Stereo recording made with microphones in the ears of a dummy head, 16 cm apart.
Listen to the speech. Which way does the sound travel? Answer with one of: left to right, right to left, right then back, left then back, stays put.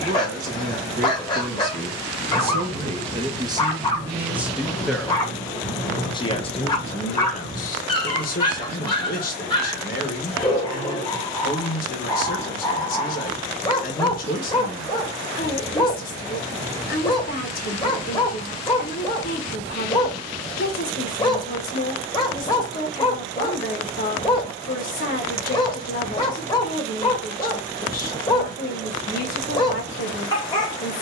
right to left.